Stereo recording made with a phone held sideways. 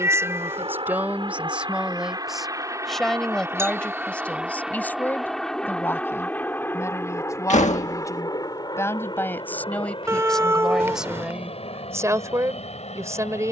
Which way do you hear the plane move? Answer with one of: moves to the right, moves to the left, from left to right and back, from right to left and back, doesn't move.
moves to the left.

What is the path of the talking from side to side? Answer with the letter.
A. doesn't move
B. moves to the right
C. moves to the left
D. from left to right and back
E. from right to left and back
E.